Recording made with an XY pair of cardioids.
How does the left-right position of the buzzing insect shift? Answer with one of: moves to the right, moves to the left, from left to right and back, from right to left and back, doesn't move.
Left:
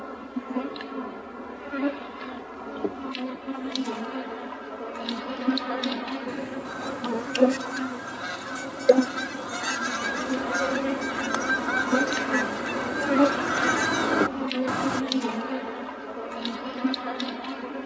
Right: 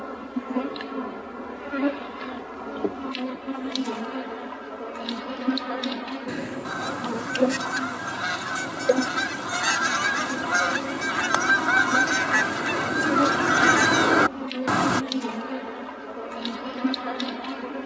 from right to left and back.